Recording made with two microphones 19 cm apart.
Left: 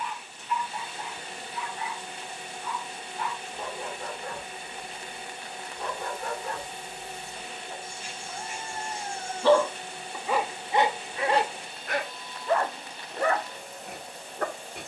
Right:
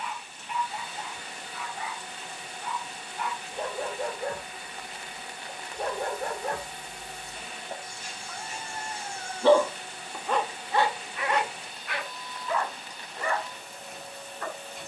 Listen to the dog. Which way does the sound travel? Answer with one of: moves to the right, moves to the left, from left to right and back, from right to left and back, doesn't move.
moves to the left.